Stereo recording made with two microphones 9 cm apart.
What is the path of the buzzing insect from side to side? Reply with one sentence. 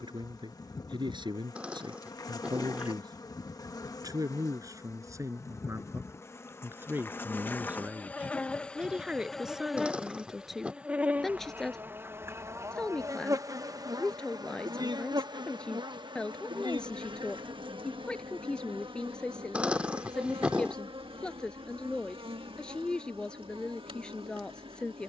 You can hear the buzzing insect go from the left side to the right.